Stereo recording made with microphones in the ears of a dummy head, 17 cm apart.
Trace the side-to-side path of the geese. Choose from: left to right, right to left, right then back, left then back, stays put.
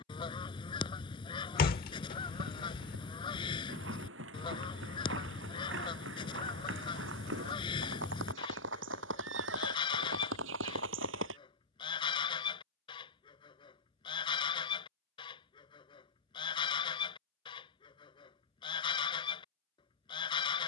stays put.